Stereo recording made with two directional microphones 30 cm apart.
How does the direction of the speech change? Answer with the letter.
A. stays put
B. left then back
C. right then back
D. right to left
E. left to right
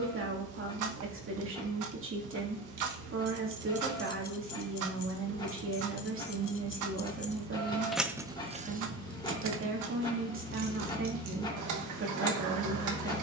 A.